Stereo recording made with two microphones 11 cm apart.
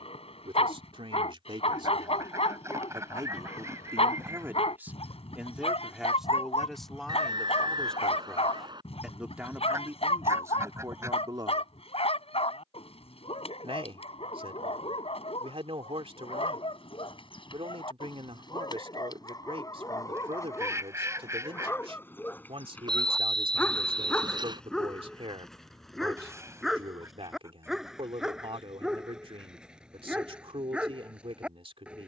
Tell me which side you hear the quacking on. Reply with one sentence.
You can hear the quacking on the right.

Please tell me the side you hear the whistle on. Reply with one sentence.
You can hear the whistle on the right.